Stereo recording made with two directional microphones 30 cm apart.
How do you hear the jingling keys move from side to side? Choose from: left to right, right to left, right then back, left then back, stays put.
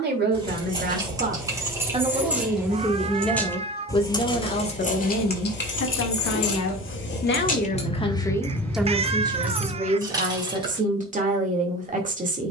left then back.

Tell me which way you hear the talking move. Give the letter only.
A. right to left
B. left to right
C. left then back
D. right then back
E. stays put
C.